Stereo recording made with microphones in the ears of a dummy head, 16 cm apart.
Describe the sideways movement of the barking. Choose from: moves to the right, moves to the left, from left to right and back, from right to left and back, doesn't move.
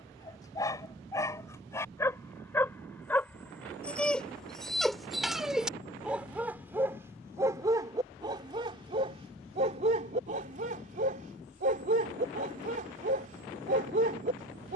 moves to the right.